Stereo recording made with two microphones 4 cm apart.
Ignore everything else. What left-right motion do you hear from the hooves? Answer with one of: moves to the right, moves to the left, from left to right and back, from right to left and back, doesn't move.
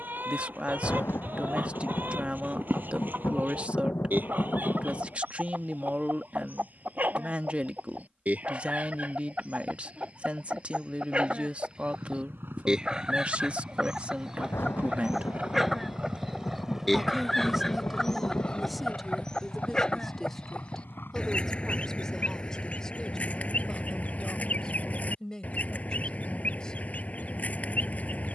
moves to the left.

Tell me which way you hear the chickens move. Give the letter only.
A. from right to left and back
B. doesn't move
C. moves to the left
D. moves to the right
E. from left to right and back
C.